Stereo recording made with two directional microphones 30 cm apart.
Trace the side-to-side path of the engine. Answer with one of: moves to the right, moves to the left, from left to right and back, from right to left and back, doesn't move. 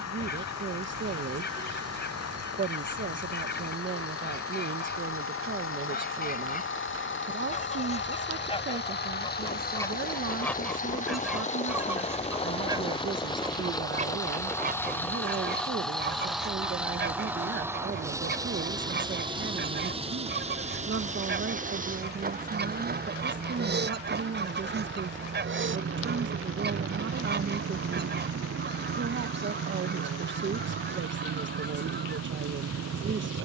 moves to the right.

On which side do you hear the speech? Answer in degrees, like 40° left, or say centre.
40° right.